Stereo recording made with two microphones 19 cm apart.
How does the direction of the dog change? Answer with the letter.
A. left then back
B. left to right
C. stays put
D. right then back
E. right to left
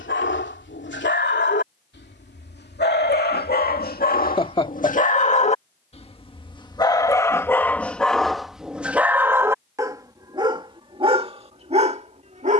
B.